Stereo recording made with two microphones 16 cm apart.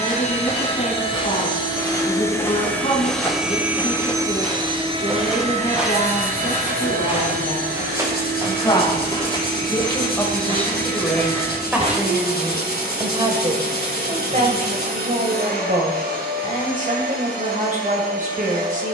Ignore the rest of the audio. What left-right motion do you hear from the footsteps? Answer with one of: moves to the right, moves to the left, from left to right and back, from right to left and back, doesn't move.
moves to the right.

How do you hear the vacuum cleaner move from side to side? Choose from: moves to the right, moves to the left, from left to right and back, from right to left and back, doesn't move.
moves to the right.